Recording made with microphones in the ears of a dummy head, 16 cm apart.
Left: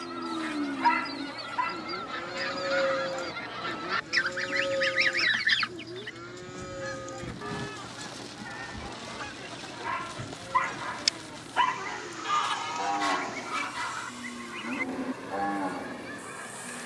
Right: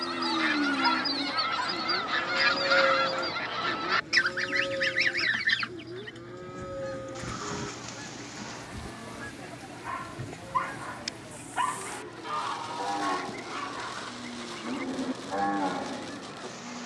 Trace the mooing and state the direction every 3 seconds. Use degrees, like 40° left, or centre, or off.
10° right, 40° left, 70° left, 80° left, 50° left, 10° right.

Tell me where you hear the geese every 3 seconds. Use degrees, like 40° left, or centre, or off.
50° right, centre, 50° left, 70° left, 80° left, 80° left.